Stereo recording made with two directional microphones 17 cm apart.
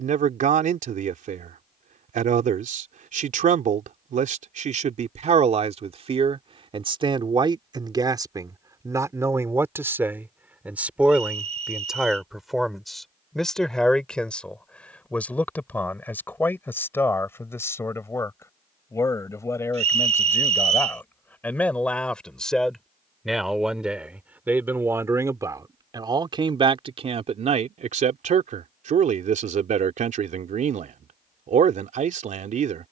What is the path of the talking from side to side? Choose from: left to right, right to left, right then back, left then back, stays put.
left then back.